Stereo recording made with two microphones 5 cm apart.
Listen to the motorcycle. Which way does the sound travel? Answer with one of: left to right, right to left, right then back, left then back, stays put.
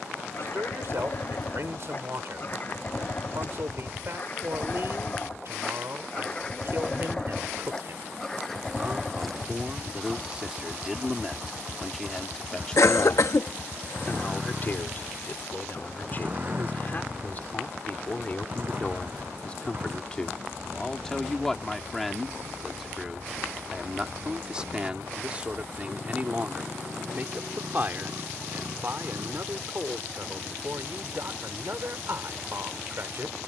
left to right.